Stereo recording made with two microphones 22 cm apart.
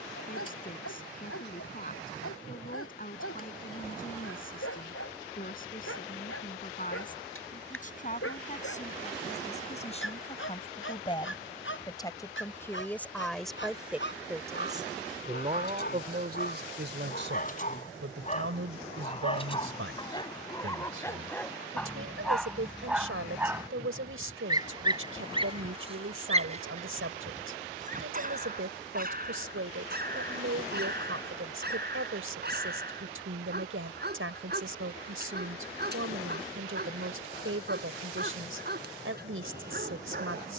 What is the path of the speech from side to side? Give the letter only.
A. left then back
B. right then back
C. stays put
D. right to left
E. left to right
E.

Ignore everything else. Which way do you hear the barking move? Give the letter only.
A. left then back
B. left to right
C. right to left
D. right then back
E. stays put
B.